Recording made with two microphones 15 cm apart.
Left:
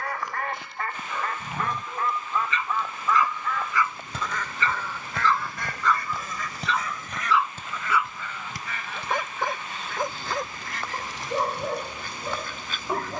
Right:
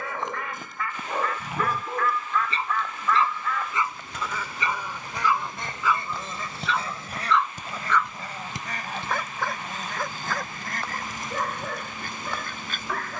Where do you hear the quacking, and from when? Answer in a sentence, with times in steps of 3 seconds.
In this clip you hear the quacking on the left from 0 s, in the centre from 3 s and on the right from 6 s.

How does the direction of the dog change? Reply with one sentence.
In this clip you hear the dog move from right to left.